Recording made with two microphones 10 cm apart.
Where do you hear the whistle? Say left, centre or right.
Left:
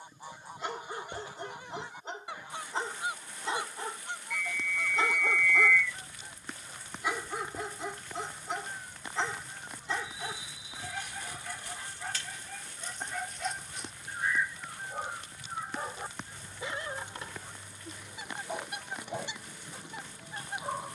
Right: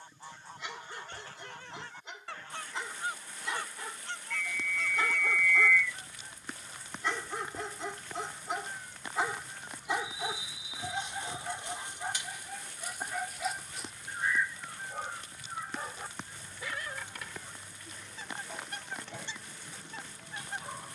centre.